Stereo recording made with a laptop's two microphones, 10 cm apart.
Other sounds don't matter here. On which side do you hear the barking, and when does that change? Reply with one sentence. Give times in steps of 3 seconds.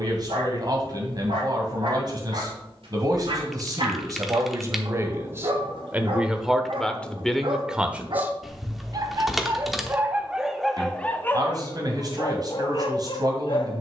You can hear the barking on the right from 0 s, in the centre from 9 s and on the left from 12 s.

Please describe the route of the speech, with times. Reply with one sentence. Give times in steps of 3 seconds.
You can hear the speech on the right from 0 s, in the centre from 6 s and on the right from 9 s.